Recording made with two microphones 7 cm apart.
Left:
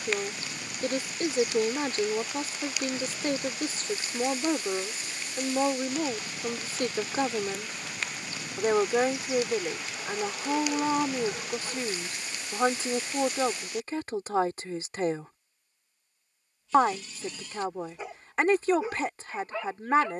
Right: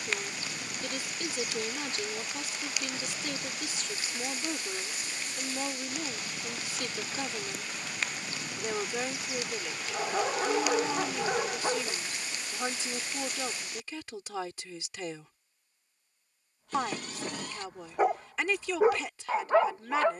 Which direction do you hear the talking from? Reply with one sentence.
You can hear the talking on the left.